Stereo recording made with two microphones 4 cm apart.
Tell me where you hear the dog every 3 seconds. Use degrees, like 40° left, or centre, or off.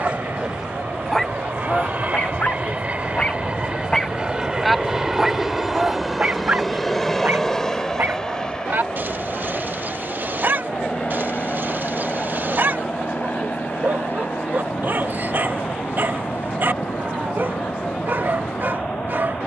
10° left, centre, 40° right, 50° right, 50° right, 50° right, 50° right.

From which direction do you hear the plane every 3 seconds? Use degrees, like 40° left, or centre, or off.
40° right, 20° right, 10° left, 30° left, 40° left, 50° left, 50° left.